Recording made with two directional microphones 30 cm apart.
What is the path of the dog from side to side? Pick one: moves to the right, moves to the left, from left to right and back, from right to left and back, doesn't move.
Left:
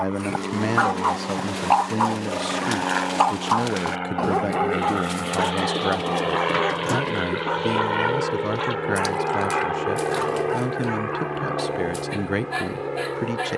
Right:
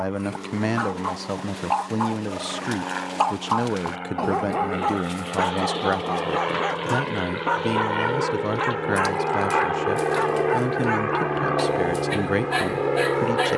moves to the right.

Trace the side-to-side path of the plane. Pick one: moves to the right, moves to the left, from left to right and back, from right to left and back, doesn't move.
moves to the right.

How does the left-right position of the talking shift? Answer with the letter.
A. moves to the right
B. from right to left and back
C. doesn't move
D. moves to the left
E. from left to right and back
C.